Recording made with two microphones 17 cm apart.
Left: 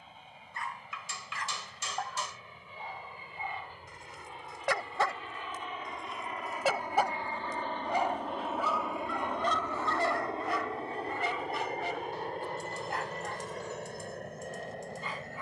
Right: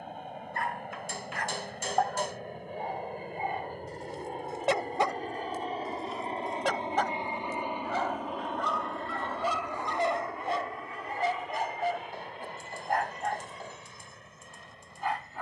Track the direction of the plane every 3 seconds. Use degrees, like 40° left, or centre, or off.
70° right, 50° right, 20° right, 30° left, 50° left.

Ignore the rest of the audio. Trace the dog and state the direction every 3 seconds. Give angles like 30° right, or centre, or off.
60° right, 40° right, 10° left, 30° right, 70° right.